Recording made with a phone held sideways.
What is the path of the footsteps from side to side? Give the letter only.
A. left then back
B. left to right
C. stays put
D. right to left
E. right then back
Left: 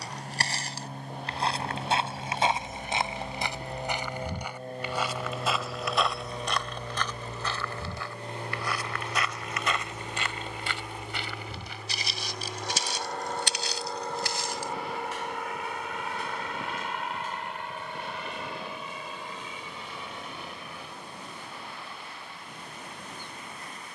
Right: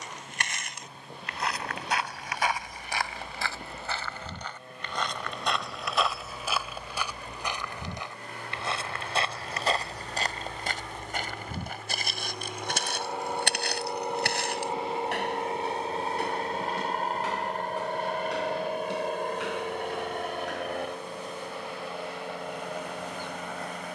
B.